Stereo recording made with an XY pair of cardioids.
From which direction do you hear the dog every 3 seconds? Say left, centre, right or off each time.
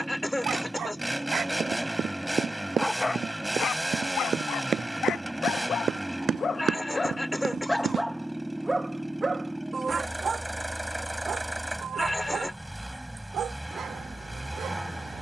right, left, centre, right, right.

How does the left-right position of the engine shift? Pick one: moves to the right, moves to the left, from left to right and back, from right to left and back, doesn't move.
doesn't move.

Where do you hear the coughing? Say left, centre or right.
centre.